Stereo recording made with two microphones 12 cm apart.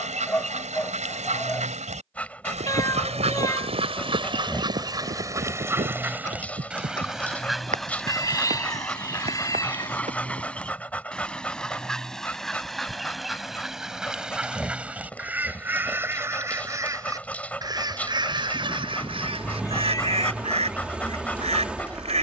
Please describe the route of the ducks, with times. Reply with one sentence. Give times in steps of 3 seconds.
In this clip you hear the ducks on the right from 0 s, in the centre from 6 s and on the right from 15 s.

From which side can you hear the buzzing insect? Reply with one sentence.
You can hear the buzzing insect in the centre.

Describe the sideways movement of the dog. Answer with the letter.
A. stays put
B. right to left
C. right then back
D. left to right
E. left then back
A.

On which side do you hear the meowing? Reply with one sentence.
You can hear the meowing on the left.